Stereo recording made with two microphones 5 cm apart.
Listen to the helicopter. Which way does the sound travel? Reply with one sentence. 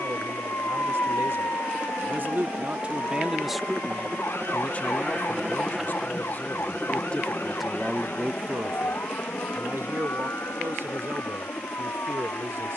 You can hear the helicopter move to the left.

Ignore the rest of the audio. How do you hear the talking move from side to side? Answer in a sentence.
You can hear the talking go left and come back.